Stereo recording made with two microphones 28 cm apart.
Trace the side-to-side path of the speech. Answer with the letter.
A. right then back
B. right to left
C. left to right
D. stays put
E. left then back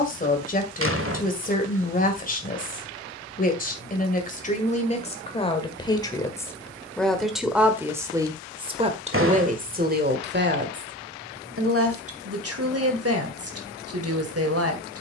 C.